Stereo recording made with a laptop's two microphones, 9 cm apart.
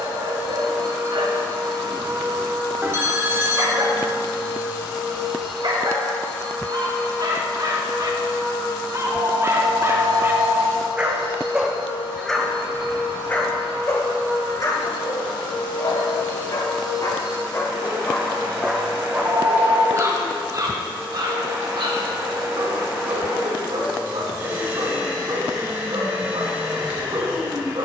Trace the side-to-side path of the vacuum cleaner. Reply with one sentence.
You can hear the vacuum cleaner go left and come back.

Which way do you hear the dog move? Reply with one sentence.
You can hear the dog move from right to left and back again.